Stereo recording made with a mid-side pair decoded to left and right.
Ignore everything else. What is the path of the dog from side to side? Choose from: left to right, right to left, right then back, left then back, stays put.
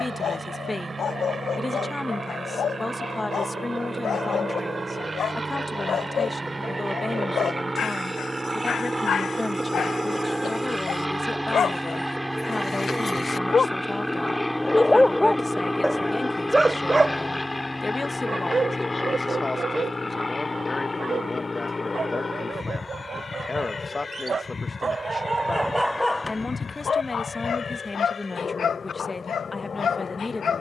right then back.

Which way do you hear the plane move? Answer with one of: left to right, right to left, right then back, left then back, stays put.
right to left.